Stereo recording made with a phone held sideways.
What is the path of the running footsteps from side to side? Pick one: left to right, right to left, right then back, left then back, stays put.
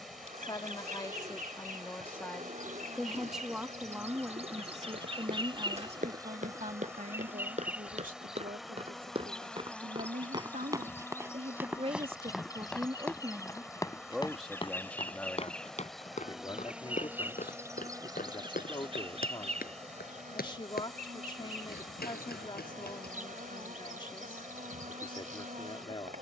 right to left.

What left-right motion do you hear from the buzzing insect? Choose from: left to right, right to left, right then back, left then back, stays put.
left then back.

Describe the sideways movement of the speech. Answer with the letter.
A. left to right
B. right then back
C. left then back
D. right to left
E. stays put
B.